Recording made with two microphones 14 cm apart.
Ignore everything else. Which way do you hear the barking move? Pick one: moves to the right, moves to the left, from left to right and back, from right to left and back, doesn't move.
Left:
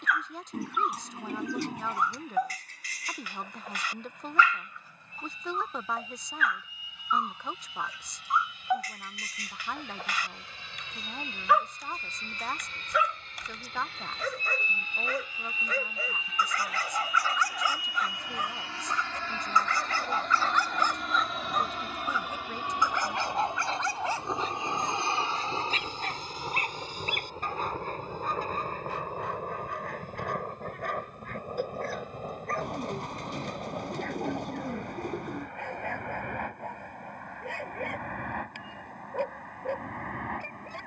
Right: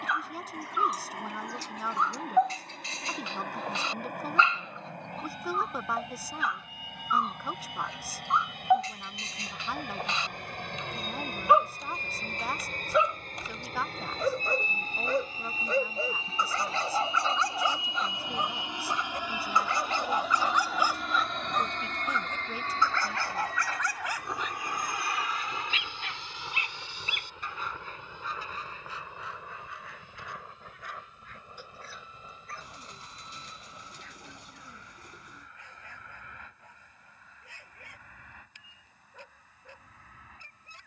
moves to the left.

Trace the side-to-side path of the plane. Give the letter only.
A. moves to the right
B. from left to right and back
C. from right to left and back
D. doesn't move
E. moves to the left
E.